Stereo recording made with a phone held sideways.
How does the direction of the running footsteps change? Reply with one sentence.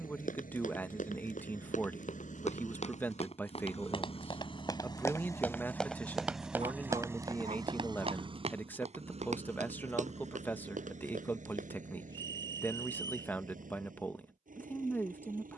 You can hear the running footsteps travel towards the right.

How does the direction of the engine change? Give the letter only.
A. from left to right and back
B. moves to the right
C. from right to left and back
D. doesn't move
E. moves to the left
B.